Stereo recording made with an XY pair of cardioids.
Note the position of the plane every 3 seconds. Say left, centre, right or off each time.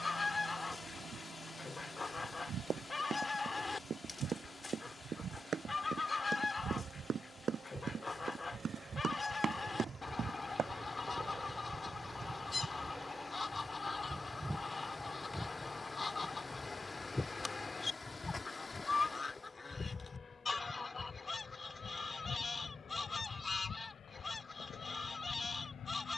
right, right, right, right, centre, centre, left, left, left.